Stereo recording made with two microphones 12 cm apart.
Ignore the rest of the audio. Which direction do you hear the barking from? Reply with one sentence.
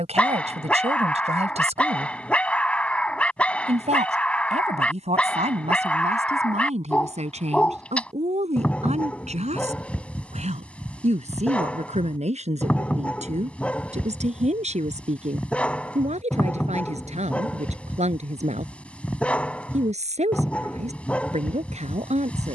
You can hear the barking in the centre.